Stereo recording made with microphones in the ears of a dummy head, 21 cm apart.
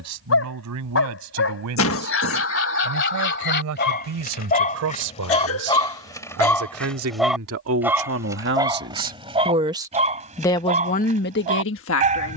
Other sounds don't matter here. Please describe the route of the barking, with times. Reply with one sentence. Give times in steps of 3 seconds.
You can hear the barking on the left from 0 s, in the centre from 6 s and on the right from 9 s.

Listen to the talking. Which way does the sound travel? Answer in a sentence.
You can hear the talking travel towards the left.